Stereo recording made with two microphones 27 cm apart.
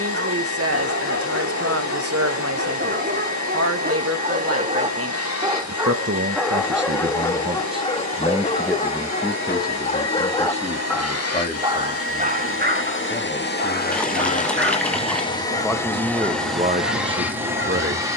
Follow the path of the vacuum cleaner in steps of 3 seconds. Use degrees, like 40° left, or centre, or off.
80° left, 80° left, 80° left, 70° left, 40° left, centre.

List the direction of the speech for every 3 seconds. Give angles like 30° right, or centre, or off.
60° right, 60° right, 30° right, 20° left, 30° left, 30° right.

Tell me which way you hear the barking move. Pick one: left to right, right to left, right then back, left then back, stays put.
left then back.